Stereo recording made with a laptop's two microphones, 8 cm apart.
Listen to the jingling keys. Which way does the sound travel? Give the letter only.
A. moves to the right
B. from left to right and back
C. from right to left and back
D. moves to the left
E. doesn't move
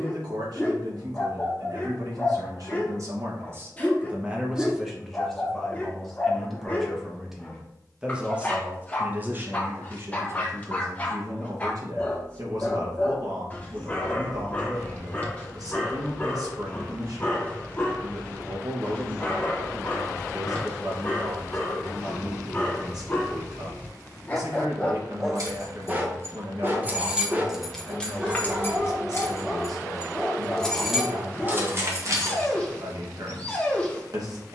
C.